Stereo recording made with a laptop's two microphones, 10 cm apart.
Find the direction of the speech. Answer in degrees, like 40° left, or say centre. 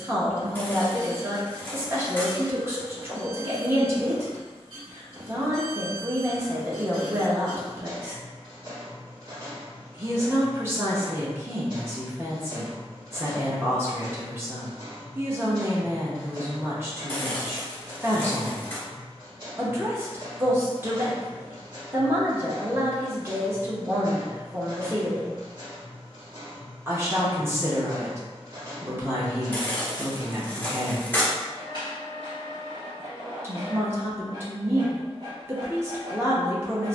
20° right.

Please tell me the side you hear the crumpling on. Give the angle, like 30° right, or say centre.
20° left.